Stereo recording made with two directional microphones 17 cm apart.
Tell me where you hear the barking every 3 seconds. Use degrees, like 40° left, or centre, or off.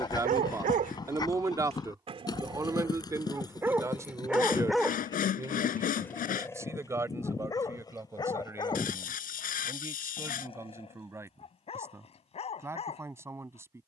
40° right, centre, 20° left, 30° left, 40° left.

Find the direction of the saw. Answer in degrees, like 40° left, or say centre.
50° left.